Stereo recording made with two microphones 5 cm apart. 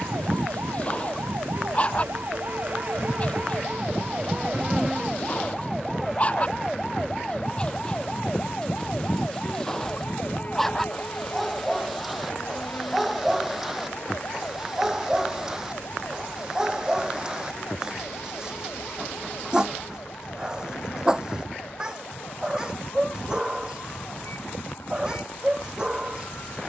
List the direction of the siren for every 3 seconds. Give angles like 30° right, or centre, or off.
50° right, 20° right, 10° left, 30° left, 40° left, 50° left, 60° left, 60° left, 60° left.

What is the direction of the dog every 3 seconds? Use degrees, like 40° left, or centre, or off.
30° left, 30° left, 20° left, 10° left, 10° right, 20° right, 20° right, 20° right, 20° right.